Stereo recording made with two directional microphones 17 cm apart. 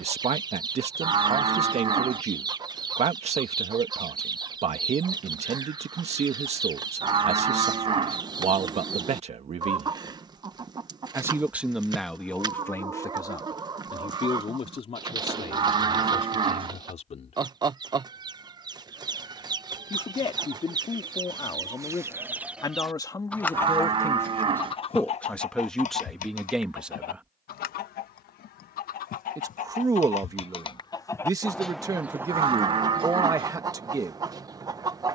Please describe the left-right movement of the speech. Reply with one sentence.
In this clip you hear the speech go left and come back.